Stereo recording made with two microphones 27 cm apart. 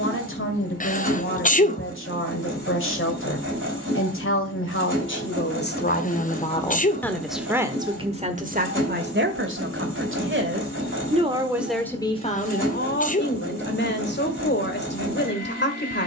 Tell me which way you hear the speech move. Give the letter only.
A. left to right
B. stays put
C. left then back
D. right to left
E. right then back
E.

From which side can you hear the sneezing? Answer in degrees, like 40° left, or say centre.
30° left.